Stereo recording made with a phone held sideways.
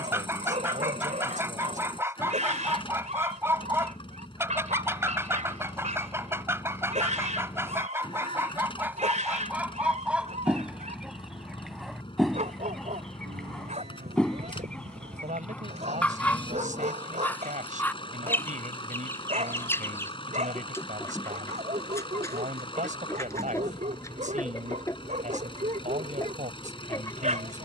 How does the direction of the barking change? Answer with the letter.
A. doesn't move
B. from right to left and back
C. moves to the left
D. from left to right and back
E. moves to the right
A.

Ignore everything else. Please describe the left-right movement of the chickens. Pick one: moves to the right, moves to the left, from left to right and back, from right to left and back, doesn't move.
moves to the left.